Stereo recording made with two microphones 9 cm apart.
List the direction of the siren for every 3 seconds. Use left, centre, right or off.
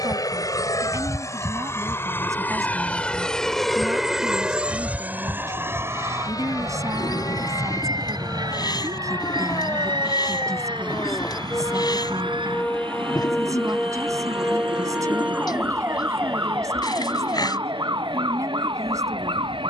left, left, left, left, centre, right, right.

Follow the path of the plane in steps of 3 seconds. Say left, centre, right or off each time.
left, centre, right, right, right, right, right.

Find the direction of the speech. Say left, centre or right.
right.